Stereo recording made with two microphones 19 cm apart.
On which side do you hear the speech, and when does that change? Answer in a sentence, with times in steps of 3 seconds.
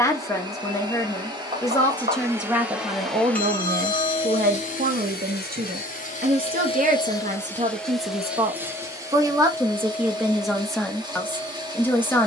In this clip you hear the speech in the centre from 0 s, on the right from 3 s and in the centre from 9 s.